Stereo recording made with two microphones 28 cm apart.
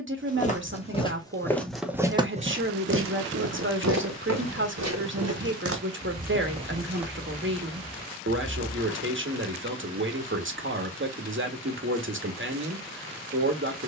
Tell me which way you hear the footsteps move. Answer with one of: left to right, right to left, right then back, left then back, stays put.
right then back.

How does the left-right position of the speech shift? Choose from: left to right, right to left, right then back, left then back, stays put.
stays put.